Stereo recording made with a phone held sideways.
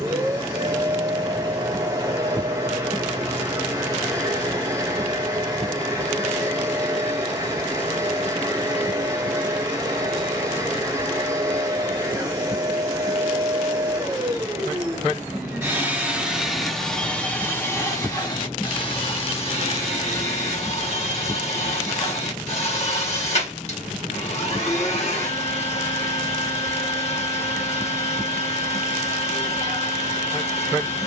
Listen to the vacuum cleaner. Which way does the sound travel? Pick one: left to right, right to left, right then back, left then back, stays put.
right to left.